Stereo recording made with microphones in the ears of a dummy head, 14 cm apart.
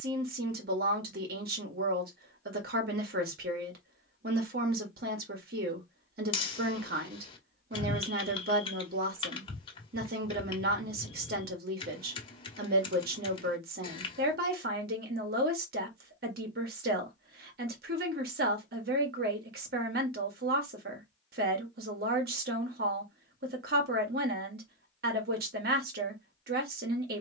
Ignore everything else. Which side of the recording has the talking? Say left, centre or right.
right.